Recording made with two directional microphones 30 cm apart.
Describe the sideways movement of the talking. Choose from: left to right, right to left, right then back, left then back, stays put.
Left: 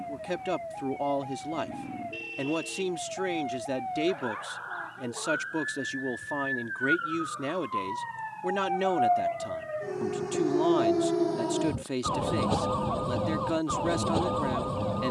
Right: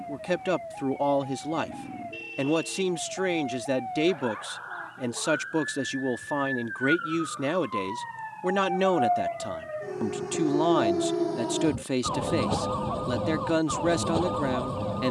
stays put.